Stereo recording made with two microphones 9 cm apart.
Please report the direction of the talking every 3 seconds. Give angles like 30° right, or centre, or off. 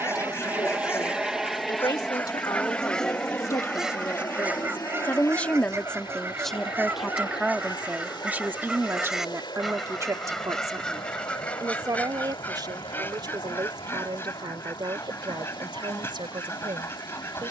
50° left, 30° left, 10° right, 40° right, 60° right, 70° right.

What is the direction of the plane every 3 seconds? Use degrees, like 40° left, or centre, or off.
centre, 30° left, 40° left, 50° left, 50° left, 60° left.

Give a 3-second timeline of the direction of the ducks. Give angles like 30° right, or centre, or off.
20° left, 20° right, 20° right, 10° left, 20° left, 30° left.